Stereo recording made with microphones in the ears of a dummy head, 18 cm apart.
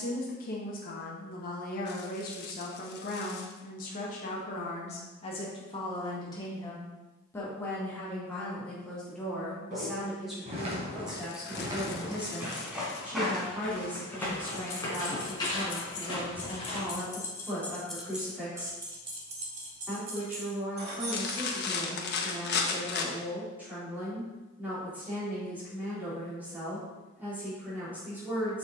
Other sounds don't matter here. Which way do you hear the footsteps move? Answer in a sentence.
In this clip you hear the footsteps move from right to left.